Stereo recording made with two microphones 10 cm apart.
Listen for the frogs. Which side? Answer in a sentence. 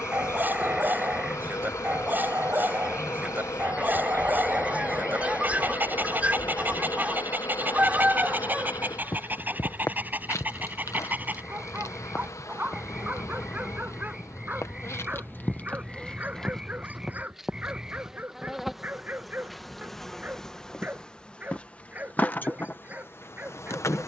You can hear the frogs in the centre.